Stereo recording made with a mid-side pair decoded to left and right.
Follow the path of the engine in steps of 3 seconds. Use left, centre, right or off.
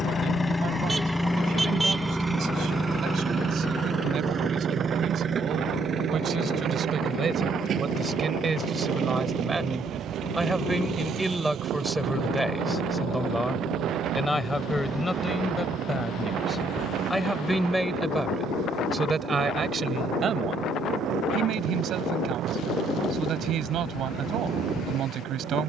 centre, right, right, right, right, right, right, right, right.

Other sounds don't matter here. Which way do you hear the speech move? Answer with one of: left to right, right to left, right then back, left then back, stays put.
left then back.